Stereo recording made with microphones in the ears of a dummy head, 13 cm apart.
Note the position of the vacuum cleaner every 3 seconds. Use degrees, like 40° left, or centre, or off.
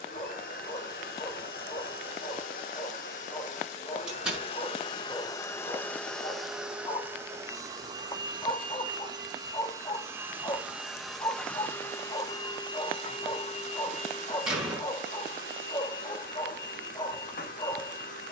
70° left, 40° left, 20° right, 10° right, 40° left, 70° left.